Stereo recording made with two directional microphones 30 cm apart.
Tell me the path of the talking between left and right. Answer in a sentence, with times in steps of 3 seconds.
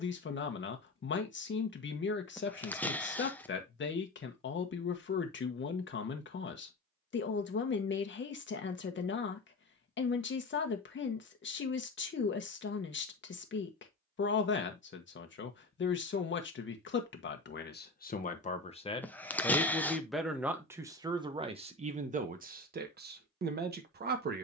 You can hear the talking on the left from 0 s, in the centre from 18 s and on the right from 21 s.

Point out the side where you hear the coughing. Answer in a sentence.
You can hear the coughing in the centre.